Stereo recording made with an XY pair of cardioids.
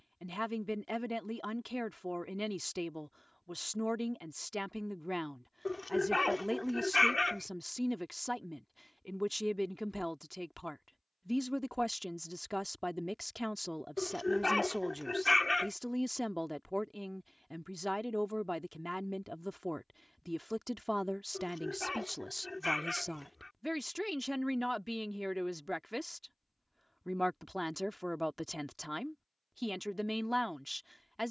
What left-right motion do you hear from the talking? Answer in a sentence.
You can hear the talking stay put.